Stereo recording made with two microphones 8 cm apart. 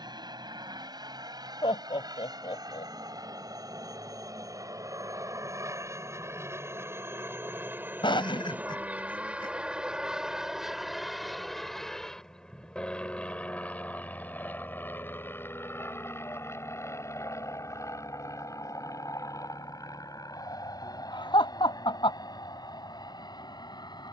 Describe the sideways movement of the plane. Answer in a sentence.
You can hear the plane go from the right side to the left.